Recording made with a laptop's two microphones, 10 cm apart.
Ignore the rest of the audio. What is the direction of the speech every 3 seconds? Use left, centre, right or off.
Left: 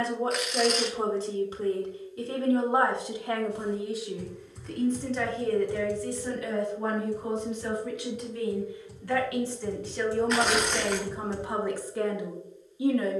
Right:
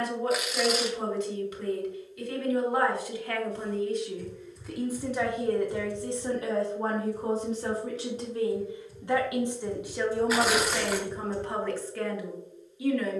left, centre, right, centre, left.